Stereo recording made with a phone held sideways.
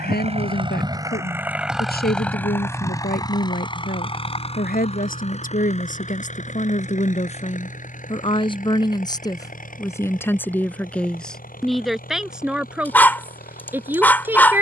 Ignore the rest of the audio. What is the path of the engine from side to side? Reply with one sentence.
You can hear the engine go from the right side to the left.